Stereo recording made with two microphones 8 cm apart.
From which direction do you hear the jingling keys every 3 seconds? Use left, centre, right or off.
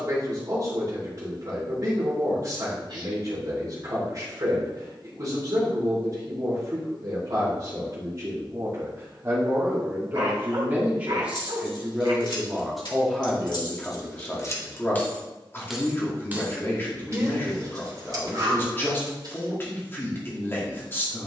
off, off, off, left, left, right, right.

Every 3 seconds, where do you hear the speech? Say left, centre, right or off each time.
right, right, right, right, centre, left, left.